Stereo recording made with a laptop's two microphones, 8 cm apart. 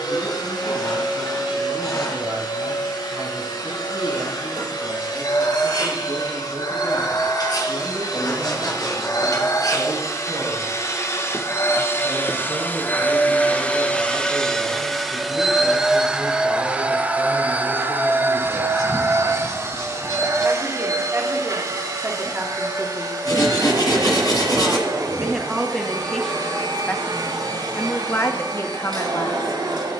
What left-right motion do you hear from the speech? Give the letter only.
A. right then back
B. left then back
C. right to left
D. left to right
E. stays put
C.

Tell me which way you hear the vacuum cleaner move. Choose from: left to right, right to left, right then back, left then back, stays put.
left to right.